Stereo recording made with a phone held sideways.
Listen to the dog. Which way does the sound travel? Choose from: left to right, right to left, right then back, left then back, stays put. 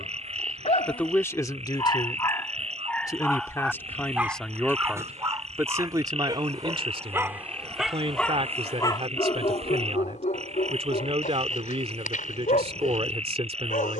right then back.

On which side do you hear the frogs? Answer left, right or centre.
right.